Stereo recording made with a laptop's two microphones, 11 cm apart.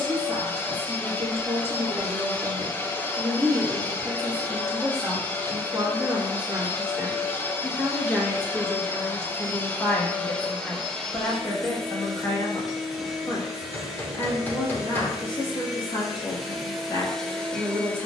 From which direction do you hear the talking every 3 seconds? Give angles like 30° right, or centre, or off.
30° right, 30° right, 10° right, 20° left, 40° left, 40° left.